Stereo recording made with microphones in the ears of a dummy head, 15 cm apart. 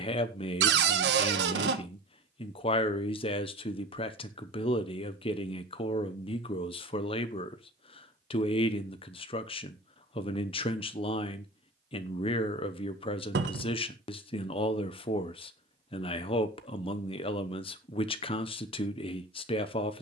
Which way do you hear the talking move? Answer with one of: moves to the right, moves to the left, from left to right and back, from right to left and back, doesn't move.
doesn't move.